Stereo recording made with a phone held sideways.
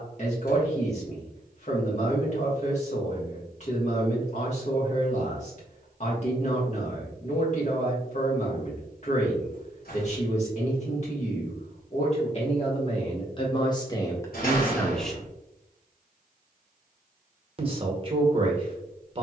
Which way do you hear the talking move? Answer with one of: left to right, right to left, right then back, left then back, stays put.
left to right.